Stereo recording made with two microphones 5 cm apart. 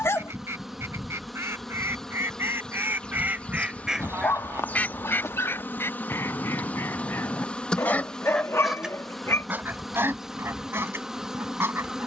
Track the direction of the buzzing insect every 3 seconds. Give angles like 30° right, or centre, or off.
centre, 40° left, 20° left, 10° right.